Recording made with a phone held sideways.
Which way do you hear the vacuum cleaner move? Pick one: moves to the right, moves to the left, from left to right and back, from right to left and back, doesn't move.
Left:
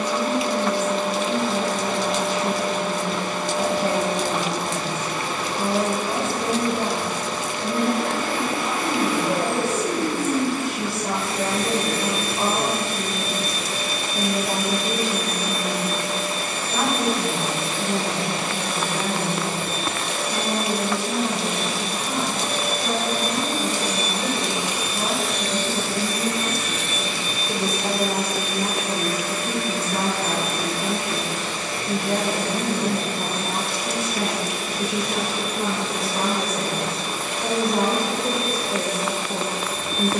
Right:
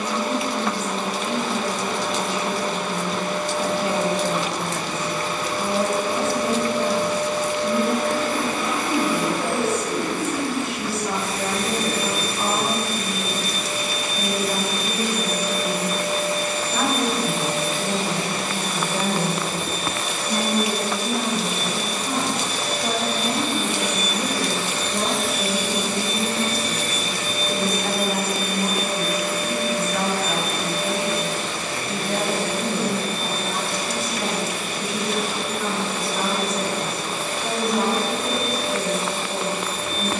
moves to the right.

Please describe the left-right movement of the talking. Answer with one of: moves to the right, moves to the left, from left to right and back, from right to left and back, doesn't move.
from left to right and back.